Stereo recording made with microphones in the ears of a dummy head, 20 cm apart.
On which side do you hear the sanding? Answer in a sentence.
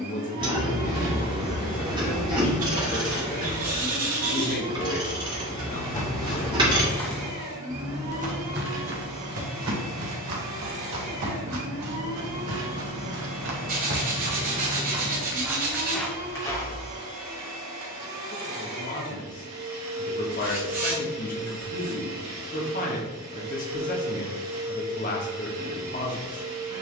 You can hear the sanding on the right.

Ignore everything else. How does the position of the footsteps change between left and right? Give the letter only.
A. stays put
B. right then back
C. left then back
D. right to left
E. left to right
B.